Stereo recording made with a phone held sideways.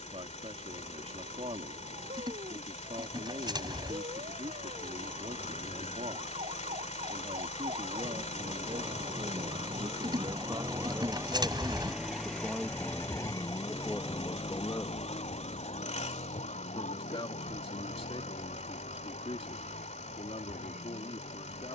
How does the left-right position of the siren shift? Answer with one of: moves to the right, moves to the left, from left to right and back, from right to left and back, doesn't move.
moves to the left.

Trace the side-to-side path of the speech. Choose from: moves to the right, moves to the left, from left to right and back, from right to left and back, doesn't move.
moves to the left.